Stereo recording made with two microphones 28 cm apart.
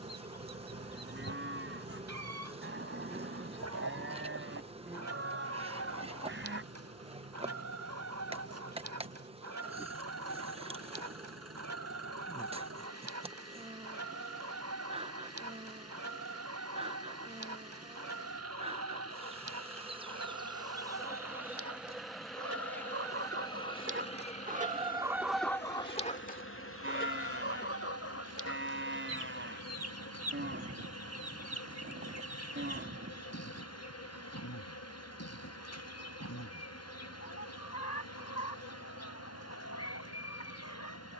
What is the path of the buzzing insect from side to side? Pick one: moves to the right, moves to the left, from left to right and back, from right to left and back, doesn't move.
moves to the left.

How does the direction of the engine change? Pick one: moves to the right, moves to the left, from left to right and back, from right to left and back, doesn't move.
doesn't move.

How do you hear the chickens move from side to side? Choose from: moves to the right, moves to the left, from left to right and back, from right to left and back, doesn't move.
moves to the left.